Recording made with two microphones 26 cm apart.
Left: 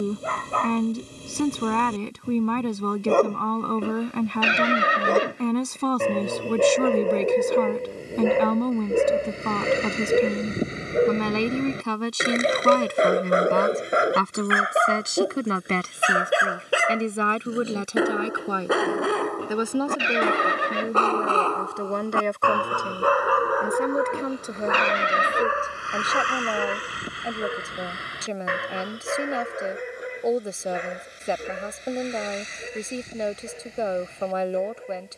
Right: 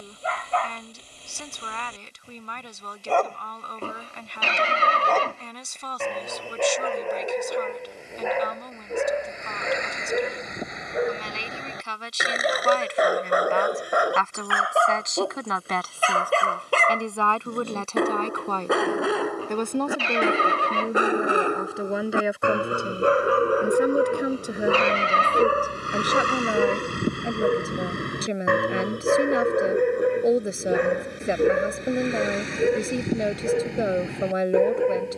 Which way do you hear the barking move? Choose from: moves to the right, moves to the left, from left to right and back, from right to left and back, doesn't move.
moves to the right.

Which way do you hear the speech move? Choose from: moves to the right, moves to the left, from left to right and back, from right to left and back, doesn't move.
moves to the right.